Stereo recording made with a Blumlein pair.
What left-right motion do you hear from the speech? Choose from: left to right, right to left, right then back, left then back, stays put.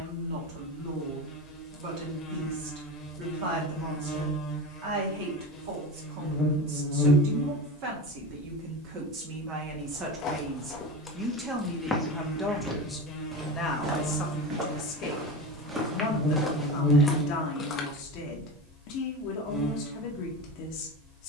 right to left.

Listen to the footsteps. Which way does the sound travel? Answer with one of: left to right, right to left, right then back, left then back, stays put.
right then back.